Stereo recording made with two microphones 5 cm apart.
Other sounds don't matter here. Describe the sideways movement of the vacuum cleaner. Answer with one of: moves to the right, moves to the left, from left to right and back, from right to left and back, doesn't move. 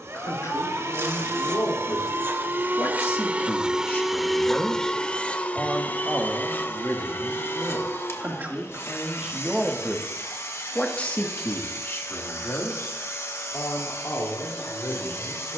moves to the left.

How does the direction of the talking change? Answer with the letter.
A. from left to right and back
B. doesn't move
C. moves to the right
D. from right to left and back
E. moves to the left
A.